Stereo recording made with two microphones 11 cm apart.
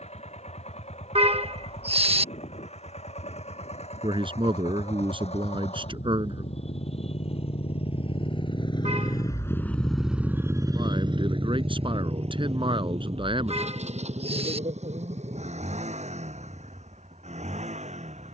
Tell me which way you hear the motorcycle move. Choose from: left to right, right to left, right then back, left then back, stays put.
left to right.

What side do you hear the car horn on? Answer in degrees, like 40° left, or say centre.
60° right.